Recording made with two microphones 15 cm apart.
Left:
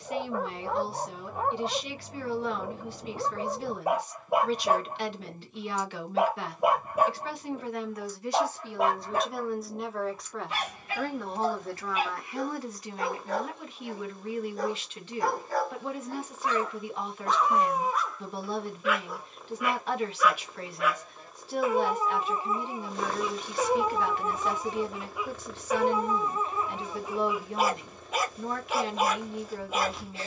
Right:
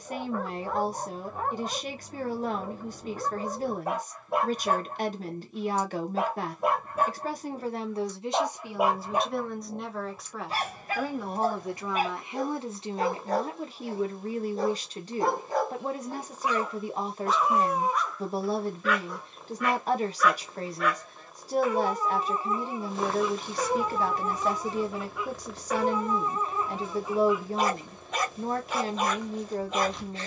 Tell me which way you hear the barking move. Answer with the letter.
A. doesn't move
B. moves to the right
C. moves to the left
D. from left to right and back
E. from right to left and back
D.